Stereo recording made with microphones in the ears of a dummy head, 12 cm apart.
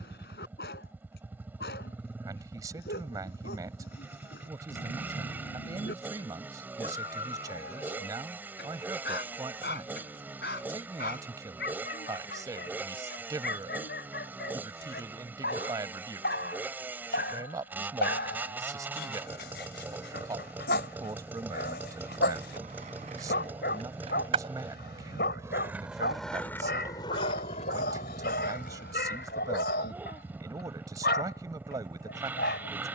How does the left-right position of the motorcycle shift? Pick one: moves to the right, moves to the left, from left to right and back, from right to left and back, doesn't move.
doesn't move.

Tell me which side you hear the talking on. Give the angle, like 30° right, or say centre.
20° right.